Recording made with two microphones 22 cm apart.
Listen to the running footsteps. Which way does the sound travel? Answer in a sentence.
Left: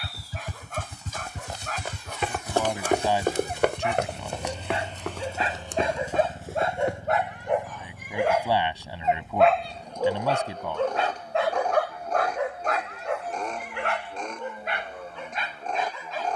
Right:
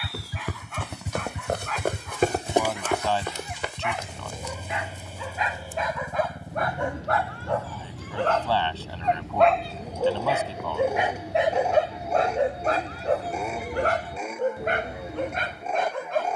In this clip you hear the running footsteps travel towards the left.